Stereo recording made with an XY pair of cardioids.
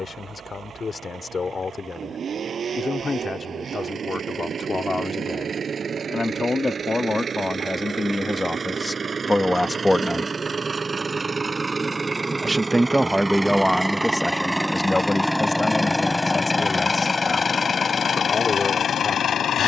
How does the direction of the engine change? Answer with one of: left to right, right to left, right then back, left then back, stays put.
right to left.